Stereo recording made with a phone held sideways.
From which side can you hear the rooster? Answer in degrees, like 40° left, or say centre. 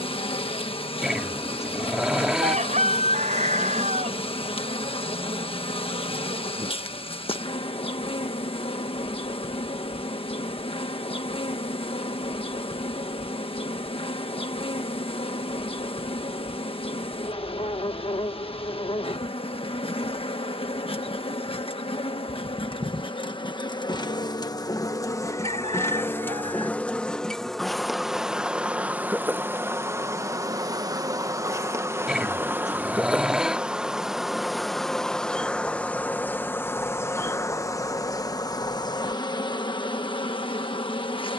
60° right.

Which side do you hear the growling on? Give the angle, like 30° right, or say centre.
centre.